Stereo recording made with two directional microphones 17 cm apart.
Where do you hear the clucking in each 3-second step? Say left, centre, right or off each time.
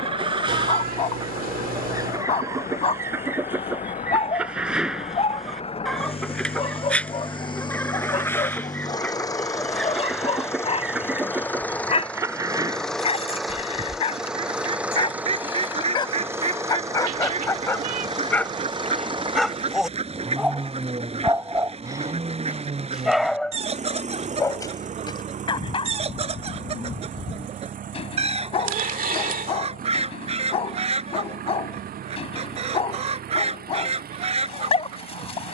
right, centre, centre, centre, right, right, right, right, right, right, right, right.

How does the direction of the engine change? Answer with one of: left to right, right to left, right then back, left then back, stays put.
left to right.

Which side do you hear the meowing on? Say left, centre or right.
right.